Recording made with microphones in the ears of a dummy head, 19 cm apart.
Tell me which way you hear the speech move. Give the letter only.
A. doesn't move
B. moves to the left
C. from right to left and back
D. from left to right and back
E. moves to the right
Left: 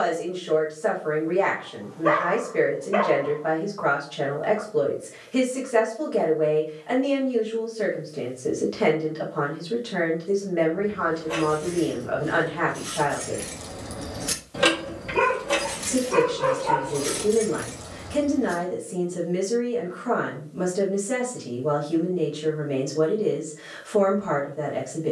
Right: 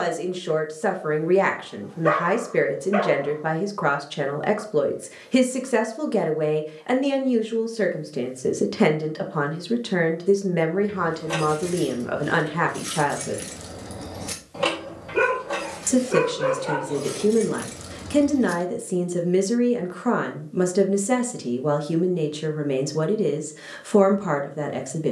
A.